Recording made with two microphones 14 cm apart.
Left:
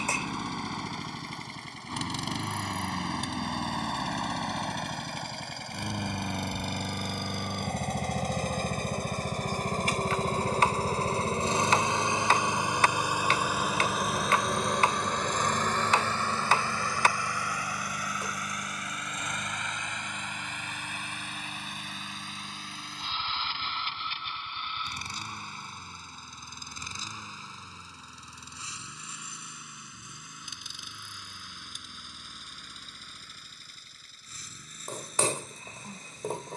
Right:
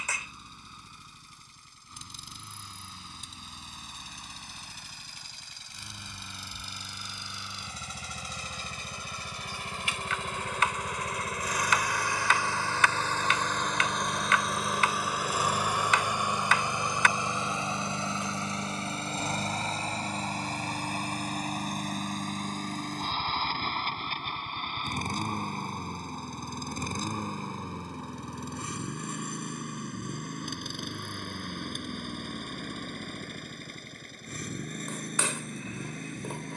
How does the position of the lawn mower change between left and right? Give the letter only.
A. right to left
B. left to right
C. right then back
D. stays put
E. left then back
B.